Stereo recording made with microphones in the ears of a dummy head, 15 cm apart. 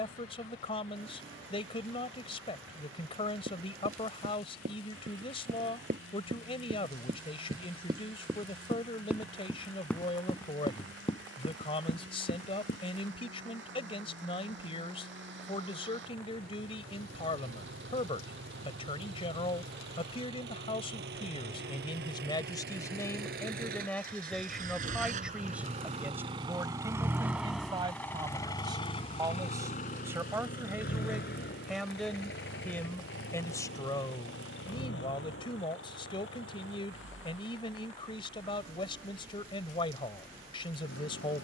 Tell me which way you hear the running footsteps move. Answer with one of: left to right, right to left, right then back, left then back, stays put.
right to left.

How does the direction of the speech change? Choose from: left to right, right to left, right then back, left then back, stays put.
right then back.